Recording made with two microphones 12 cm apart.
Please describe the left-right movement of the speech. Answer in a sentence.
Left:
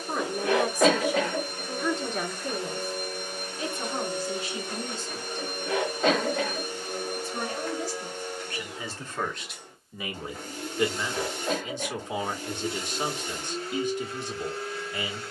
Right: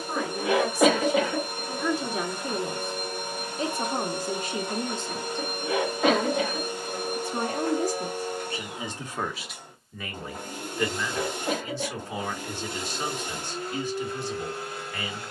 In this clip you hear the speech move from left to right and back again.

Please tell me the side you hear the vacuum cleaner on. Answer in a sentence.
You can hear the vacuum cleaner on the right.